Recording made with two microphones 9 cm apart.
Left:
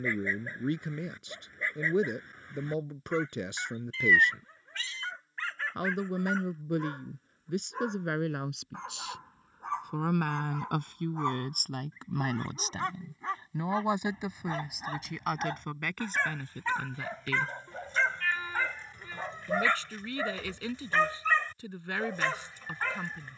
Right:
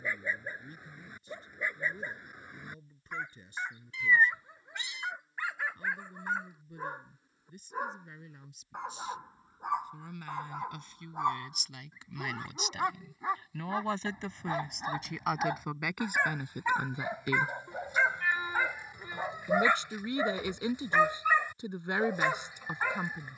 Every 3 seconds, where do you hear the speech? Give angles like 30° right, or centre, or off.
80° left, 80° left, 80° left, 60° left, 20° left, 10° right, 20° right, 20° right.